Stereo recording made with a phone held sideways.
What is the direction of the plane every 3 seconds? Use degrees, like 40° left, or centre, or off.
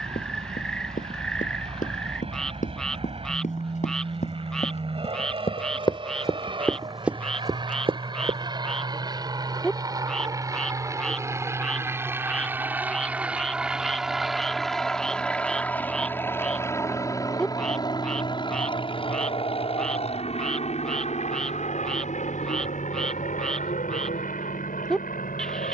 50° right, 40° right, 40° right, 30° right, 10° right, 20° left, 40° left, 60° left, 70° left.